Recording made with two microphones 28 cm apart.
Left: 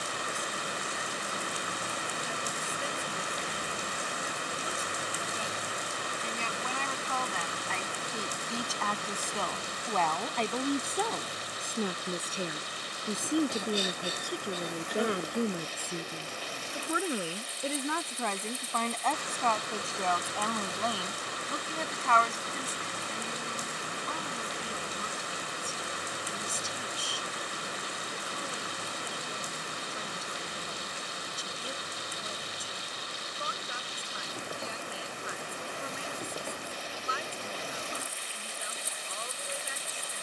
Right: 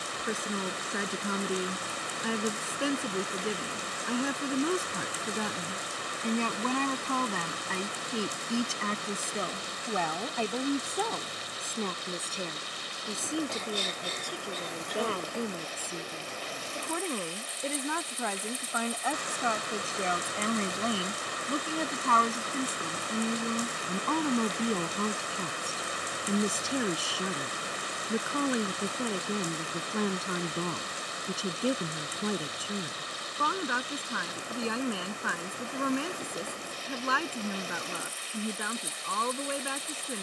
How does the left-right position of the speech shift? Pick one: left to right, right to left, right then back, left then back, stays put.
left then back.